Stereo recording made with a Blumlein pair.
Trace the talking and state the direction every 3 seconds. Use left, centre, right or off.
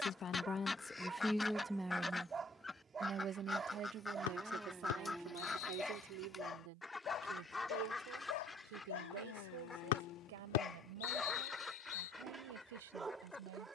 centre, right, right, right, right.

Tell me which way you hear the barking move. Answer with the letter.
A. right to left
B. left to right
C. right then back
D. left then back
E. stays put
D.